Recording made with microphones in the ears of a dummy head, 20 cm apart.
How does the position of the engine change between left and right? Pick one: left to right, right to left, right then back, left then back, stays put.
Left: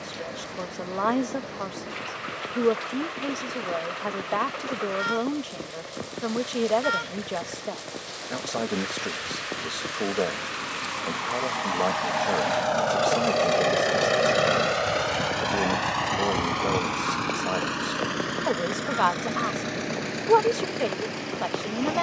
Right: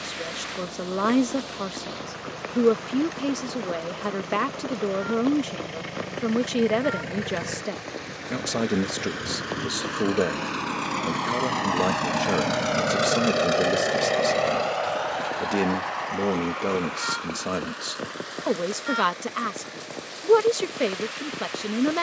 right to left.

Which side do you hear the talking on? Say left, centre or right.
right.